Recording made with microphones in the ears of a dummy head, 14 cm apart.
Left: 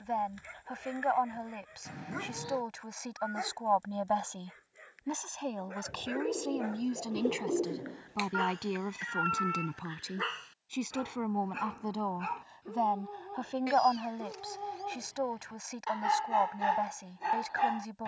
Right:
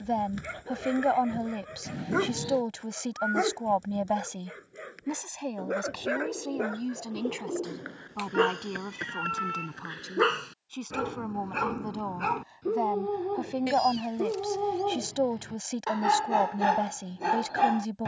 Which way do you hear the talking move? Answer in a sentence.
In this clip you hear the talking go left and come back.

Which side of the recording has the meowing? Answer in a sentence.
In this clip you hear the meowing on the right.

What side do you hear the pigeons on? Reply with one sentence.
You can hear the pigeons in the centre.